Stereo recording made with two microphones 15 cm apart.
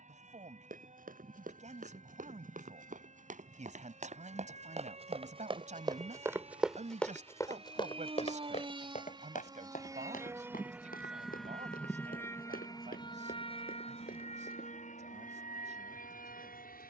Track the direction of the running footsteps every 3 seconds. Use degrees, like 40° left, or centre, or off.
70° right, 50° right, 20° left, 70° left, 80° left, off.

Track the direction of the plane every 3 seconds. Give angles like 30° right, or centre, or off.
60° right, 60° right, 50° right, 10° right, 40° left, 60° left.